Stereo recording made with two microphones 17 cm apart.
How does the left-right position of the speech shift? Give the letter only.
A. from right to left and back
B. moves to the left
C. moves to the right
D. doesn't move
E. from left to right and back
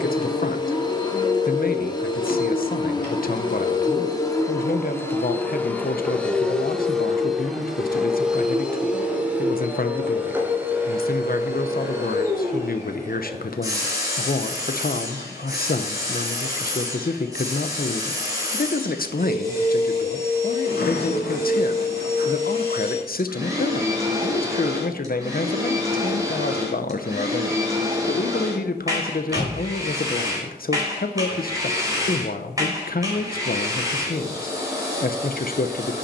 D.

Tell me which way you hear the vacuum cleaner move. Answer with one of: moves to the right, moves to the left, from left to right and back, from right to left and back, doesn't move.
moves to the right.